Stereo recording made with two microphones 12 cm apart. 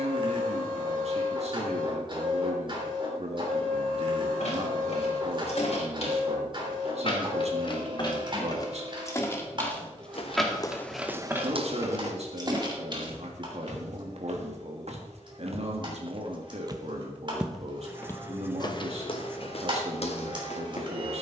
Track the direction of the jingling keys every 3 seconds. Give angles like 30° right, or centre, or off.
off, 60° left, 40° left, centre, 40° right, off, off.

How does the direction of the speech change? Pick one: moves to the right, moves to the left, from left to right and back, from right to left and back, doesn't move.
doesn't move.